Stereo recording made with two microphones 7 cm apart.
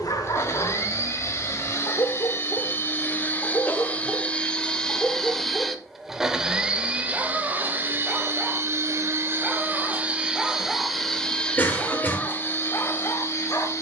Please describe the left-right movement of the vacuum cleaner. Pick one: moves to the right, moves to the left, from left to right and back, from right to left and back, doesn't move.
from left to right and back.